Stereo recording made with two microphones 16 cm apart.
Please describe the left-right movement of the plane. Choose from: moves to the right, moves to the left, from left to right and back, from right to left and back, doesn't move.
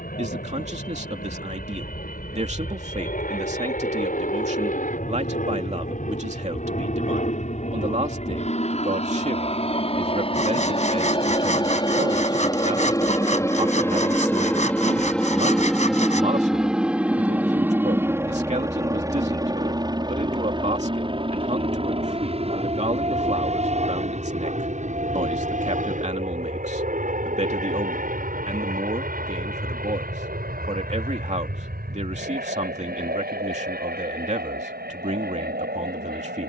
moves to the right.